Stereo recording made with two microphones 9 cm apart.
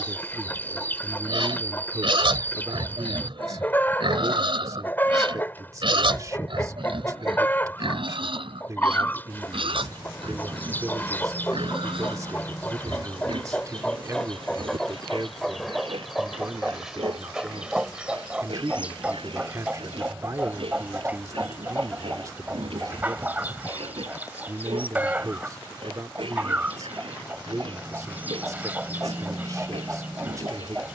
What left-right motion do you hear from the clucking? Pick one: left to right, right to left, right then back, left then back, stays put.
left to right.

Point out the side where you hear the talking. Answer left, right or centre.
right.